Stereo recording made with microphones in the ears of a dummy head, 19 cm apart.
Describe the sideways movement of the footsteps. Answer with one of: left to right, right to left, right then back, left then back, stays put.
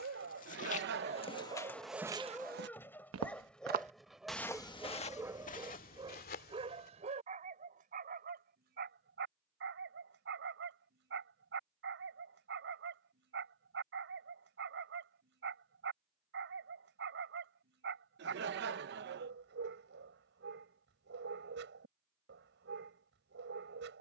right then back.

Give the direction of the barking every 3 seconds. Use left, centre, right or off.
right, centre, right, right, right, right, right, right.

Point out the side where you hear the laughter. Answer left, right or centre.
right.